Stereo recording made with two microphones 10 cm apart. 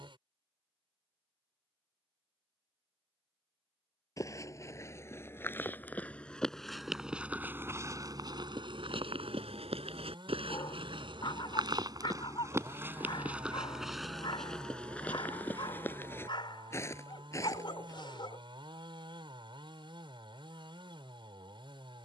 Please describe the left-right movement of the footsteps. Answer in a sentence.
In this clip you hear the footsteps go right and come back.